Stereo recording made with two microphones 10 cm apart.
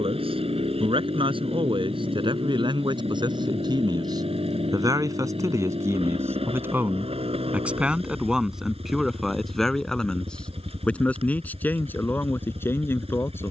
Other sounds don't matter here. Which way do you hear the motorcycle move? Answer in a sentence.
In this clip you hear the motorcycle stay in one place.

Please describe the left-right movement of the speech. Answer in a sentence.
In this clip you hear the speech move from right to left.